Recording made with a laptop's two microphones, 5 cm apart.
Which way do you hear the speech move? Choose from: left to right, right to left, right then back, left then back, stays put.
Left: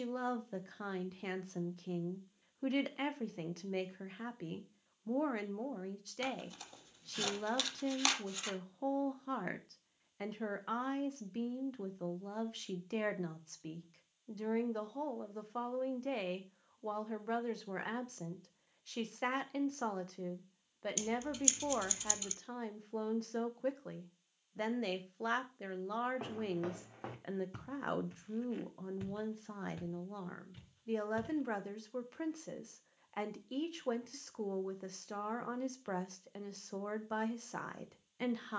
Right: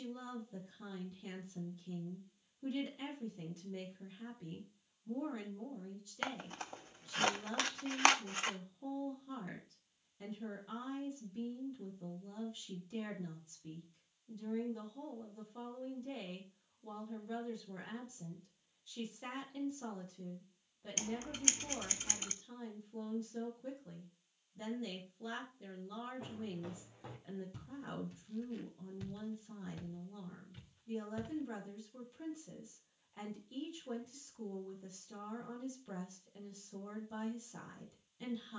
stays put.